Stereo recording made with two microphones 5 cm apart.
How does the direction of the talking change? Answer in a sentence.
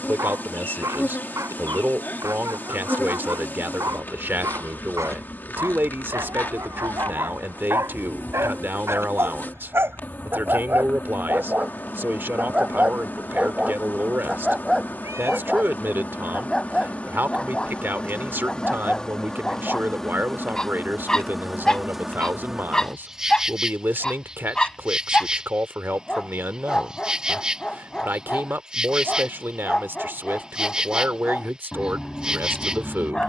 In this clip you hear the talking stay put.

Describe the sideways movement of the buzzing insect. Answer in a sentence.
You can hear the buzzing insect travel towards the right.